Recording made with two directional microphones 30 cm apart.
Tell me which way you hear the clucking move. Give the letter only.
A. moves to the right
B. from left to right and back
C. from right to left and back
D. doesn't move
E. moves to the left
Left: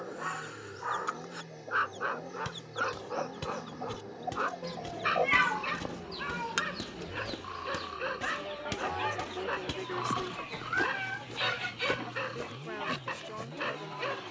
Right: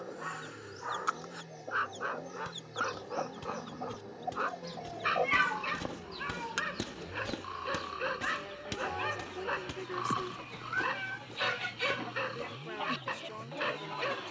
C.